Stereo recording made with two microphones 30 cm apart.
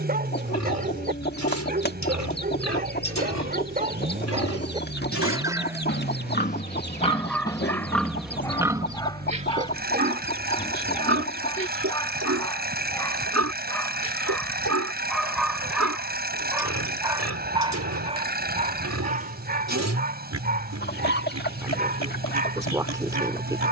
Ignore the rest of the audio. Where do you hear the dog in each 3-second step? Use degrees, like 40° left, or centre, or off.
30° right, 20° right, 10° left, 10° left, 10° left, 10° right, 30° right, 30° right.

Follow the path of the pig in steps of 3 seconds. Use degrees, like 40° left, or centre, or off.
60° left, 50° left, 10° left, 40° right, 60° right, 60° right, 60° right, 60° right.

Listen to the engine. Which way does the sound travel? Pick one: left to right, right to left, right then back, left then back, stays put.
stays put.